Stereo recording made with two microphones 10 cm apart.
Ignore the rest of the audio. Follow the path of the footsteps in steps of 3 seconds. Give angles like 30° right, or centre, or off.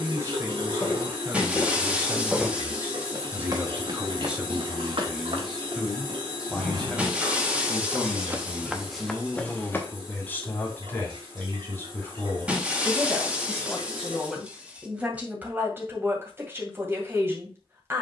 10° left, 60° right, 30° right, 20° left, off, off.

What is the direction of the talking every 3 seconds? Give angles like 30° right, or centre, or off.
30° right, 10° right, 10° left, 20° left, 10° left, 20° right.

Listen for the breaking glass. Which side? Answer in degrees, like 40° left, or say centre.
10° right.